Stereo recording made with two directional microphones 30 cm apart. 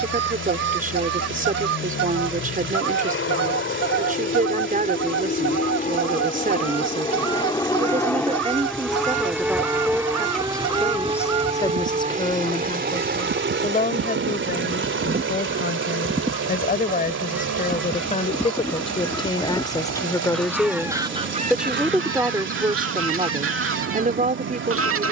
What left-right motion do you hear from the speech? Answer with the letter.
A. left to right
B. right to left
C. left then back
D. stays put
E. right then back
C.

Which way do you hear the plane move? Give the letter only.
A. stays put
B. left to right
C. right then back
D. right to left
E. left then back
B.